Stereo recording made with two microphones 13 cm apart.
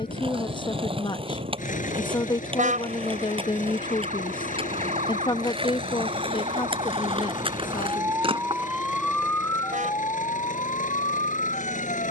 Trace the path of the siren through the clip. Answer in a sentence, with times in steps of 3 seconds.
In this clip you hear the siren on the right from 0 s and on the left from 9 s.